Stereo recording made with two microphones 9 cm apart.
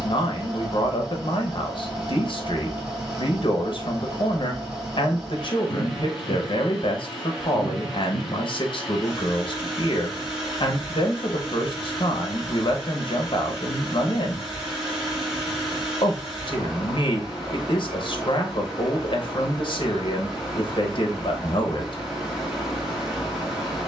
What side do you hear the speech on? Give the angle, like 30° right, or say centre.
60° left.